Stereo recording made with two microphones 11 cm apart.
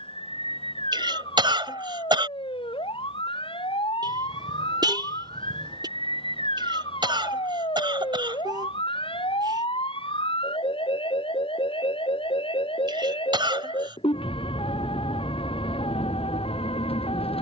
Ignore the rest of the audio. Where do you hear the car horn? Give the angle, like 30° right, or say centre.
40° right.